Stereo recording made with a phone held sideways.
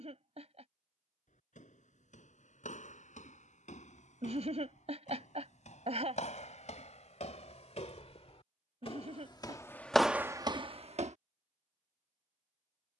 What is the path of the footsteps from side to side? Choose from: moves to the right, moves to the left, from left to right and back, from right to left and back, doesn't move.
moves to the right.